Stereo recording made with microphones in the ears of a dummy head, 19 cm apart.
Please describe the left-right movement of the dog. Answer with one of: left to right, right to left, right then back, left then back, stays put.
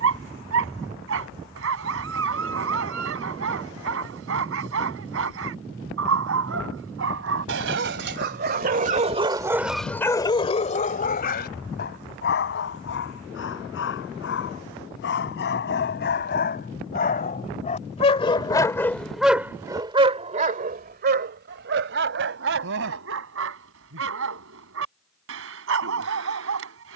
left then back.